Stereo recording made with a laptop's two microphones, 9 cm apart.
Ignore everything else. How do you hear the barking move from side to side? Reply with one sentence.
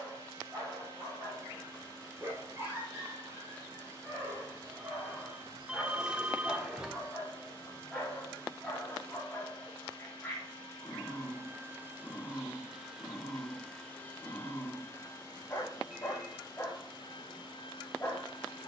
You can hear the barking move from right to left.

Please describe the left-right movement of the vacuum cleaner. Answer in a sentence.
You can hear the vacuum cleaner travel towards the left.